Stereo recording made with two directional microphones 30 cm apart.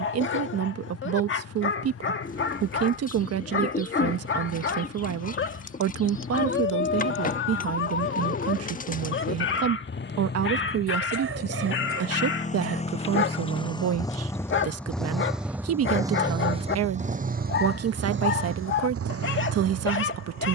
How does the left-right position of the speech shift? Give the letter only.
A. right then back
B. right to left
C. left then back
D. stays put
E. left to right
D.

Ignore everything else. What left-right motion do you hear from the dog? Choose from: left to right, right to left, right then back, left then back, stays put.
stays put.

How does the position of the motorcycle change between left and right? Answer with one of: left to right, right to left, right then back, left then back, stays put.
left to right.